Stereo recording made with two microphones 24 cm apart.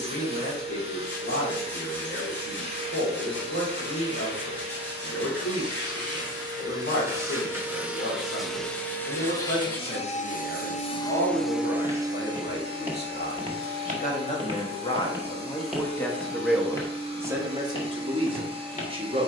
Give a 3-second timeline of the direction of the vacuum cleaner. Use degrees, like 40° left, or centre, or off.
20° right, 20° right, 10° right, 20° left, 20° right, 20° right, 20° right.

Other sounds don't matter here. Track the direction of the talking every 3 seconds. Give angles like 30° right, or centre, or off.
60° left, 60° left, 60° left, 60° left, 40° left, centre, 20° right.